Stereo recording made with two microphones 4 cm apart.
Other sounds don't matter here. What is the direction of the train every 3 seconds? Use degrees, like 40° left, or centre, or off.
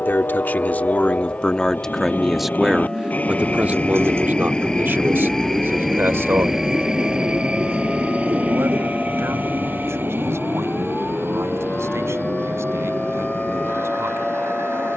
50° left, 20° left, 20° right, 50° right, 60° right.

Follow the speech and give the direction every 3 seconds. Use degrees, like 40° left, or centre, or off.
20° left, 40° right, 60° right, 70° right, 80° right.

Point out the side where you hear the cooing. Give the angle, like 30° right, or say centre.
60° right.